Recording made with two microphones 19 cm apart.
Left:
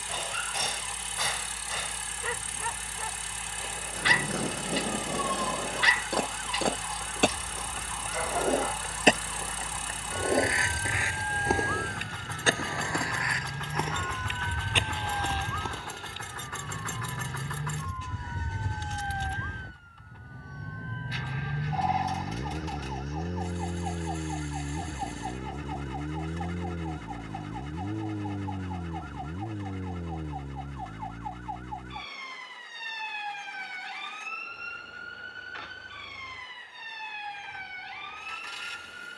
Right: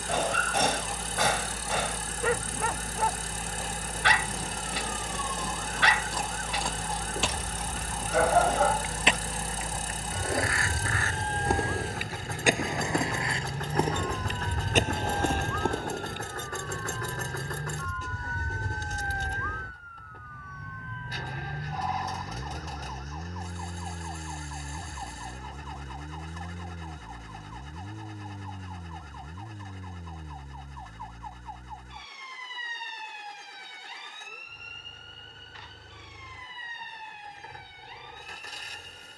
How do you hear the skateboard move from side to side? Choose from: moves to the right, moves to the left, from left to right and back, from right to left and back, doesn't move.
moves to the right.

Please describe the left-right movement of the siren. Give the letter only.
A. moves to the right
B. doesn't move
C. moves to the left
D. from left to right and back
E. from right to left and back
C.